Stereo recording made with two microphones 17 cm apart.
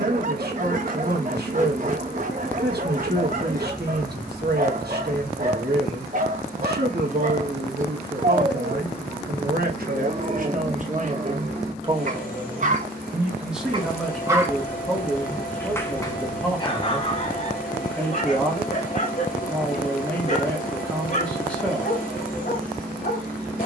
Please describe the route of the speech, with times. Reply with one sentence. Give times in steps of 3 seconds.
You can hear the speech on the right from 0 s and in the centre from 12 s.